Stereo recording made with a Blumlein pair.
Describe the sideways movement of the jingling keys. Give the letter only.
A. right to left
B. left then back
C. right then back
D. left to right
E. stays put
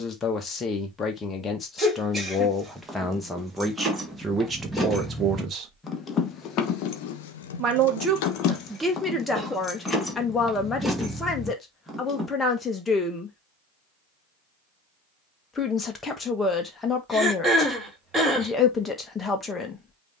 B.